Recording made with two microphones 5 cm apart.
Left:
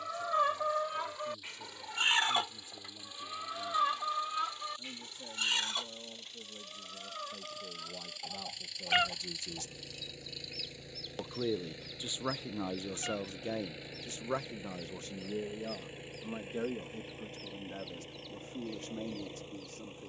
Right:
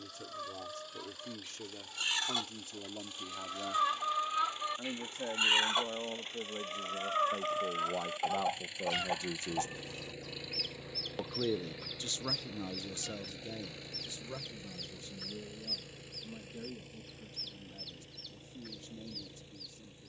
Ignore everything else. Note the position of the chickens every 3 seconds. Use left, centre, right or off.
left, centre, right, right, right, right, right.